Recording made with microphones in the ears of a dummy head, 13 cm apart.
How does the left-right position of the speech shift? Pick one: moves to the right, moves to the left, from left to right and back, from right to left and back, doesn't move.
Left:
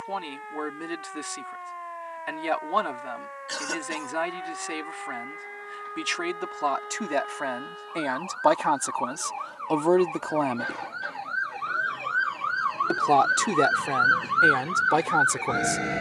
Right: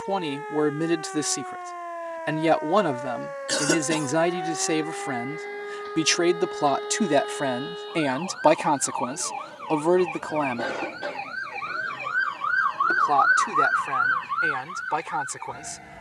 moves to the left.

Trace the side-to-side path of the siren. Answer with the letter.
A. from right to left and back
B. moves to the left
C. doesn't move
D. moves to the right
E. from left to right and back
B.